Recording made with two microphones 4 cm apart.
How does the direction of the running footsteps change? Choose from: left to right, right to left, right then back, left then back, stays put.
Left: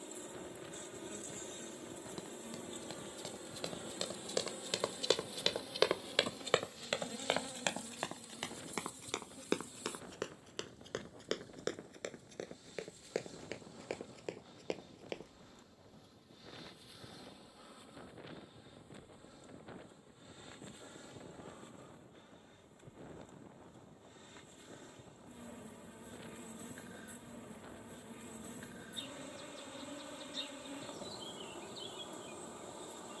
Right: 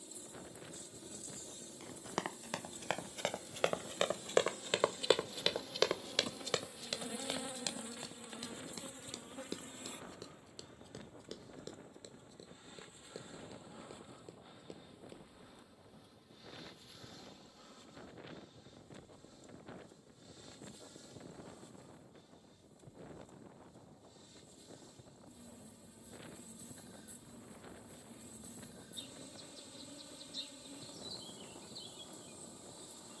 right to left.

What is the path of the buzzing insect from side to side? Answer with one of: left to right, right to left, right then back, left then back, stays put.
right then back.